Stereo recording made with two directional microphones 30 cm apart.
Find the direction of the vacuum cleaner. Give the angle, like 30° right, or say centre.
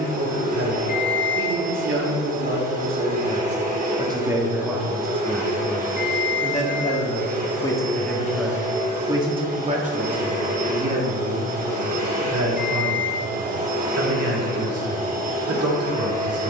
30° right.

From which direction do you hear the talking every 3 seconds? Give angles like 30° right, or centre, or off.
40° right, 10° right, 10° left, 30° right, 50° right, 50° right.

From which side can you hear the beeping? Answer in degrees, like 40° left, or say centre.
30° left.